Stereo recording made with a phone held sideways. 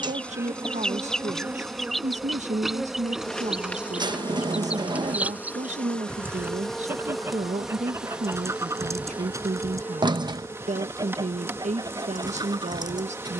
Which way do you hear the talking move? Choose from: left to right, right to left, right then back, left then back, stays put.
stays put.